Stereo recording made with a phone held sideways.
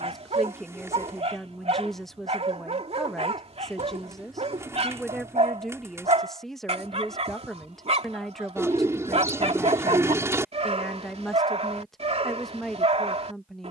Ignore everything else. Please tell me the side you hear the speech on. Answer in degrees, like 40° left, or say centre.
centre.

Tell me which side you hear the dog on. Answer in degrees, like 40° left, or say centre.
50° right.